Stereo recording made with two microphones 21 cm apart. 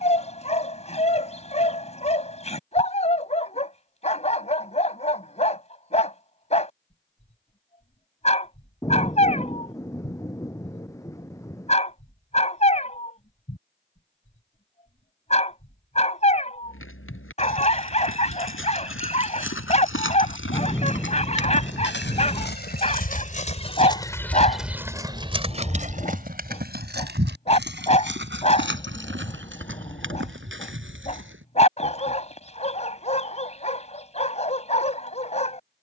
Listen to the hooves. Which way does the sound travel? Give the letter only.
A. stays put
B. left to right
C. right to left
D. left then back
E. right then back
B.